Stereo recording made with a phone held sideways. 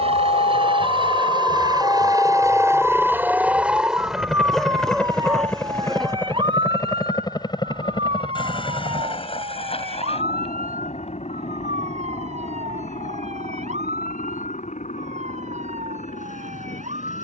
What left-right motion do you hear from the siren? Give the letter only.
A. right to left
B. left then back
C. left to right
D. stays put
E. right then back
C.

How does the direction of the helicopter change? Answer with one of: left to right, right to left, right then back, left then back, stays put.
right to left.